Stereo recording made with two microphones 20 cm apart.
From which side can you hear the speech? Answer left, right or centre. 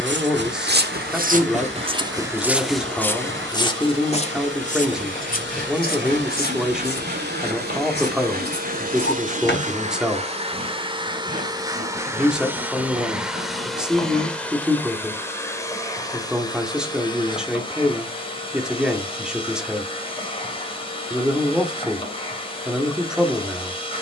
centre.